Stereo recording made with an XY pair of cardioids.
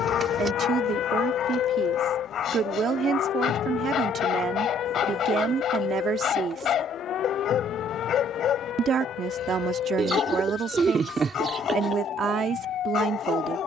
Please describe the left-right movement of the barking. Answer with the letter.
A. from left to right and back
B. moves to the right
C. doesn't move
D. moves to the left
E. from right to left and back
C.